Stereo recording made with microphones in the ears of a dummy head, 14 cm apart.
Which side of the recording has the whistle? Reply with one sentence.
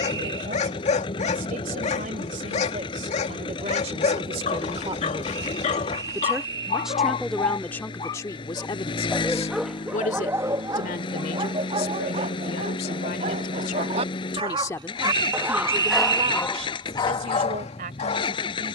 In this clip you hear the whistle on the right.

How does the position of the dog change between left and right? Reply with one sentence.
You can hear the dog go right and come back.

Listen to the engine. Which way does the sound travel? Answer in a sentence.
In this clip you hear the engine stay put.